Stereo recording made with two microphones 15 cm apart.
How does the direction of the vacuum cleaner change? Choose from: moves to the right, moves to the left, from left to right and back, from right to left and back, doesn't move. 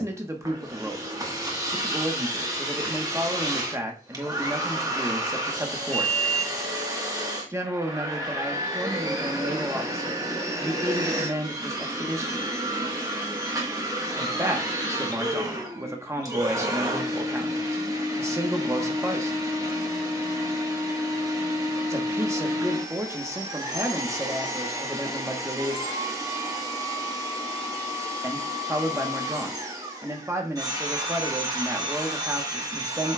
doesn't move.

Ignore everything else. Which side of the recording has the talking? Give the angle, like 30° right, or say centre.
20° right.